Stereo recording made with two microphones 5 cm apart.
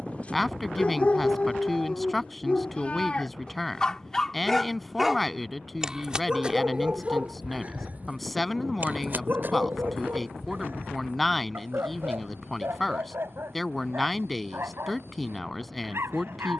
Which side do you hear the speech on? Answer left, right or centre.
centre.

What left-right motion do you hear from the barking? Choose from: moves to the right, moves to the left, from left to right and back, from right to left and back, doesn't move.
moves to the right.